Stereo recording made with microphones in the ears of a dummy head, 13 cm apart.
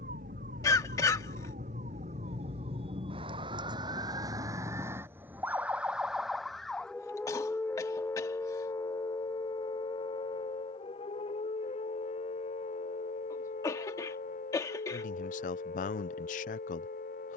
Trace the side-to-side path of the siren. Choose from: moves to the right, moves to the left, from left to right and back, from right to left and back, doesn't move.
moves to the left.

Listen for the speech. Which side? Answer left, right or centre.
left.